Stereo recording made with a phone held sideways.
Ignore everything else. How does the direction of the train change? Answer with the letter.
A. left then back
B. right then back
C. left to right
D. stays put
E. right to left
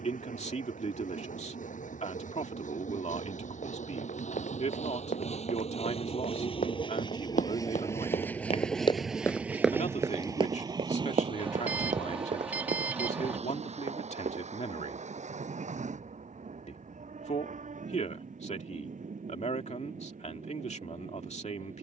C.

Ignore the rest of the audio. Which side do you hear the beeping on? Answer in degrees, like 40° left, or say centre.
10° right.